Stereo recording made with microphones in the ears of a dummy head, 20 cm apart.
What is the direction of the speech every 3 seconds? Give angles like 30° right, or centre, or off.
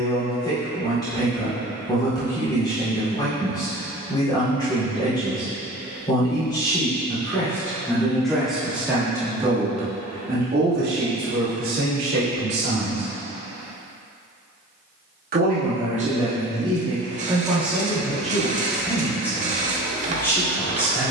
20° left, 20° left, 10° left, 40° right, 80° right, 20° right, 10° left.